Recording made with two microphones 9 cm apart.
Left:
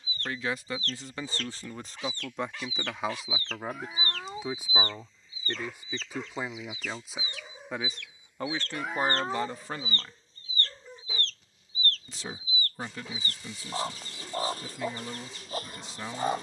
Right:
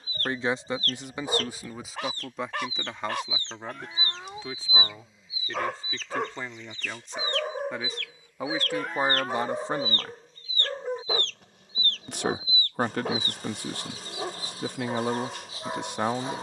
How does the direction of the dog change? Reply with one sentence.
In this clip you hear the dog stay in one place.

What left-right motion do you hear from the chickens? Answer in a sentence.
In this clip you hear the chickens move from right to left.